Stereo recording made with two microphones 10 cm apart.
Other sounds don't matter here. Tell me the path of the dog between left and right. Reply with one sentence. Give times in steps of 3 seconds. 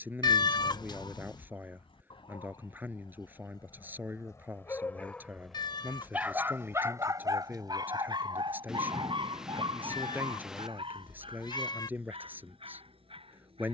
In this clip you hear the dog on the left from 0 s and on the right from 6 s.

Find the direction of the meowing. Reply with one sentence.
In this clip you hear the meowing on the left.